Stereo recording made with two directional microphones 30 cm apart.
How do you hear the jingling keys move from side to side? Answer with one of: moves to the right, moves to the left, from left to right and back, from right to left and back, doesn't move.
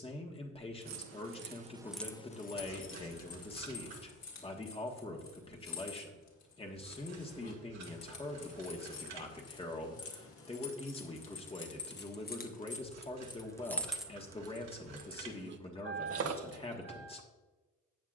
from right to left and back.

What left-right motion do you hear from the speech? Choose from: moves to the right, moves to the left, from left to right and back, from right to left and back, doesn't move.
doesn't move.